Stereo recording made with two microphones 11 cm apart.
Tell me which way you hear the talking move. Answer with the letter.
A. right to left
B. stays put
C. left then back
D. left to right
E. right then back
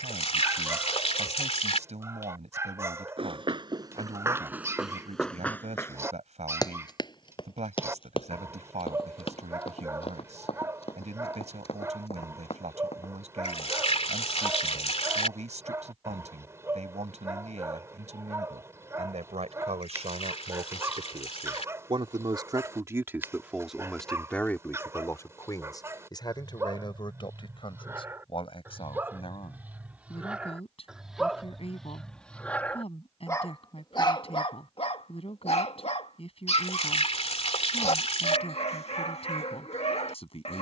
A.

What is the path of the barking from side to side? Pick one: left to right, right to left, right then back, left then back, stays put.
right to left.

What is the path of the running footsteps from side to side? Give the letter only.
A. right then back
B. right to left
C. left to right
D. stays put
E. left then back
B.